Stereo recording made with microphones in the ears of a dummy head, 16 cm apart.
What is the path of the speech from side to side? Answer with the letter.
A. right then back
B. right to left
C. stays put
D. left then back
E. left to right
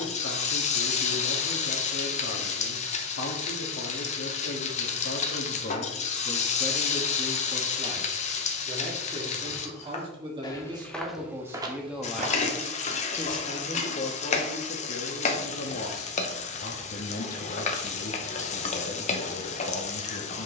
A.